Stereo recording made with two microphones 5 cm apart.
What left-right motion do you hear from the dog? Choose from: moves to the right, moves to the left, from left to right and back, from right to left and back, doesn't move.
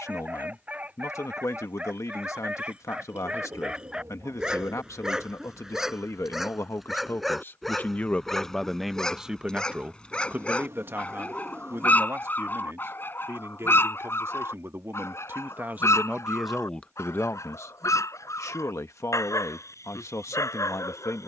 moves to the left.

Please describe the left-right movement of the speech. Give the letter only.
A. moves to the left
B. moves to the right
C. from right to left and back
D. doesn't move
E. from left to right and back
E.